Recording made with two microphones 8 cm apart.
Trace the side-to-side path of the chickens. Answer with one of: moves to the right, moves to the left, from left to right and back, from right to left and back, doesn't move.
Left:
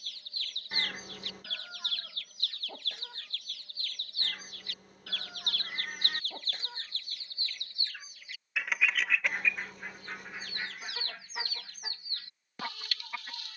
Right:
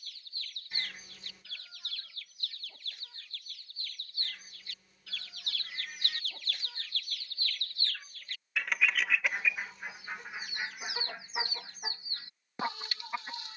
moves to the right.